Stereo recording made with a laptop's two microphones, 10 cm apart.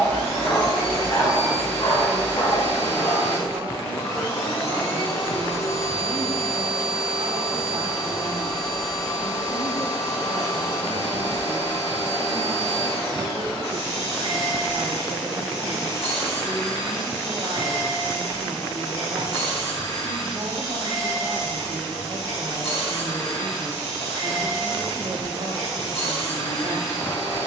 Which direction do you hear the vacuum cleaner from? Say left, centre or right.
left.